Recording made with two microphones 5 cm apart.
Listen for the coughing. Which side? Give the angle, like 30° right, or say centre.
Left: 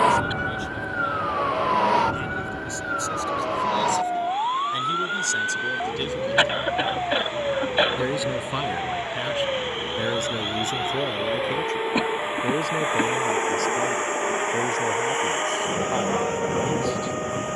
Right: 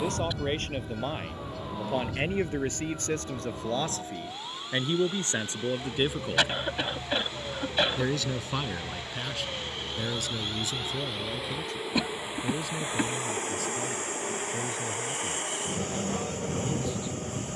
30° left.